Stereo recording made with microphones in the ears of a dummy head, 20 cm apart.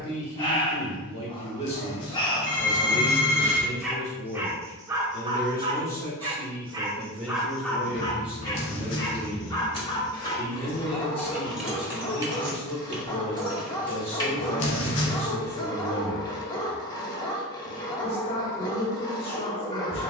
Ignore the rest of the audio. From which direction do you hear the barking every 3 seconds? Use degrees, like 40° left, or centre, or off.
20° left, 10° right, centre, 20° left, 20° left, 20° left, 20° left.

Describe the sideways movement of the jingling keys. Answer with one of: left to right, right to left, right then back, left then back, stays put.
right then back.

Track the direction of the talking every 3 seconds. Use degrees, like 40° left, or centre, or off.
30° left, 20° left, centre, 20° left, 30° left, 30° left, 30° left.